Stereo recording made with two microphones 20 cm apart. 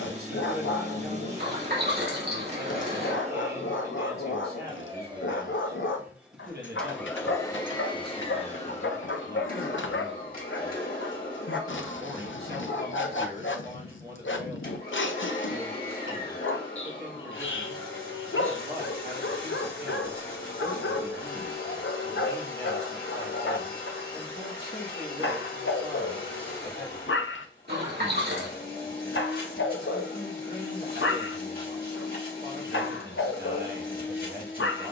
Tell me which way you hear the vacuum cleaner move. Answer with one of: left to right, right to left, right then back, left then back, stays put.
right to left.